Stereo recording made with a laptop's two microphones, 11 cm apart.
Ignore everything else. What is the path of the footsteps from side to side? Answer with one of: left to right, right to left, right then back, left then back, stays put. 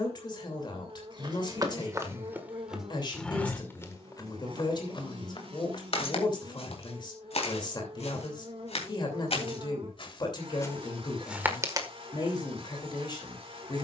left then back.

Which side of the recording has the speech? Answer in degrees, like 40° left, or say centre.
40° left.